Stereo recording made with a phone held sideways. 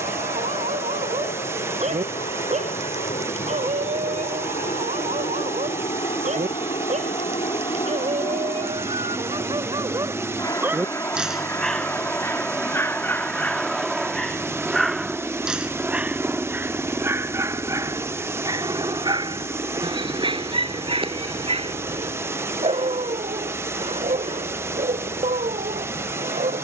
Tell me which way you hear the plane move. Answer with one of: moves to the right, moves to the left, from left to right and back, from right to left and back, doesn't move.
moves to the right.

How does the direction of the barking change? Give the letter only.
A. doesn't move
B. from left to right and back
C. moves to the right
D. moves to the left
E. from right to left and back
E.